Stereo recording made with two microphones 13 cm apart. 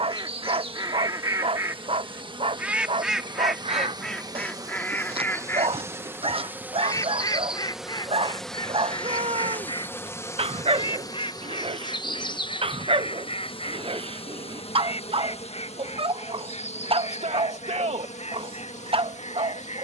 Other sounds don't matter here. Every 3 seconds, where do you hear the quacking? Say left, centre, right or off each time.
right, centre, left, left, left, left, left.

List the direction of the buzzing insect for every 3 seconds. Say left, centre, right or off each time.
right, right, centre, left, left, left, left.